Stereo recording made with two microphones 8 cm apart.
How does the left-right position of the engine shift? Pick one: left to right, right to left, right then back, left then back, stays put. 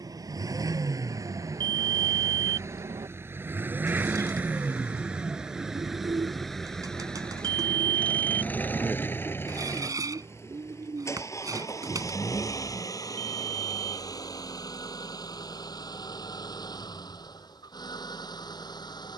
right to left.